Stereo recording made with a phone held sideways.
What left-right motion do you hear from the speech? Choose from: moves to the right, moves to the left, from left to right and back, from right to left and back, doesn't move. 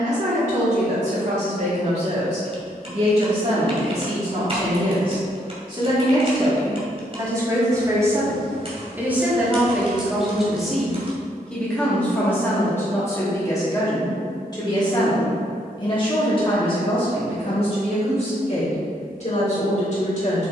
moves to the left.